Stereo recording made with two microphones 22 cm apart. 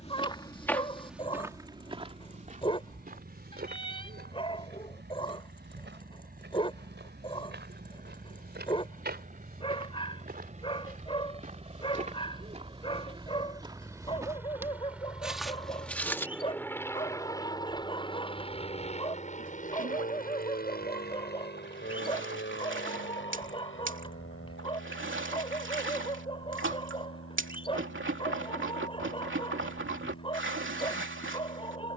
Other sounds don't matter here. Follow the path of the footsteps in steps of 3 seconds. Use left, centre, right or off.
centre, right, right, right, right, centre, off, off, off, off, off.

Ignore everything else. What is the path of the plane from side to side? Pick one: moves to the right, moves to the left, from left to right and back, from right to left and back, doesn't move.
moves to the left.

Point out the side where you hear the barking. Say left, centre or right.
left.